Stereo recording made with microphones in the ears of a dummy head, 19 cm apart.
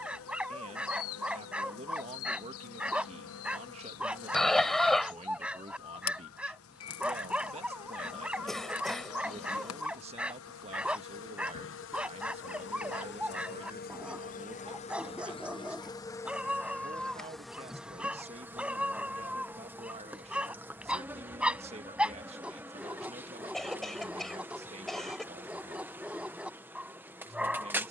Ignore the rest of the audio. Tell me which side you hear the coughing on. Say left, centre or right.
centre.